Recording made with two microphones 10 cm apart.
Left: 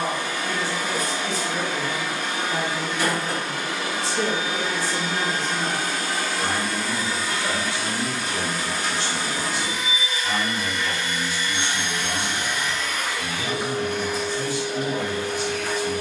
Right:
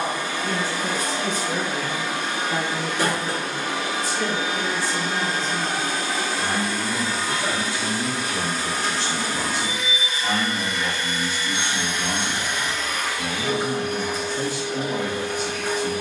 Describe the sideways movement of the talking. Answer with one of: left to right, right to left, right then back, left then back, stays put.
left then back.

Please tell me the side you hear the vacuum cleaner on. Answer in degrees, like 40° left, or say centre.
40° right.